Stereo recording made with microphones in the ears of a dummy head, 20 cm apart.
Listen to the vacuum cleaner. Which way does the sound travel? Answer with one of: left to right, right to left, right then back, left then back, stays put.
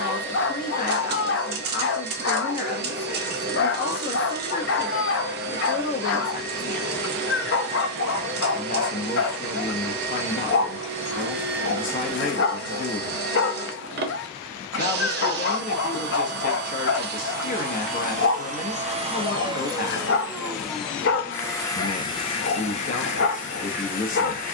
right to left.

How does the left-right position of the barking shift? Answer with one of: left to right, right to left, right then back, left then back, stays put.
stays put.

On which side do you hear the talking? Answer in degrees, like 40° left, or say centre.
40° left.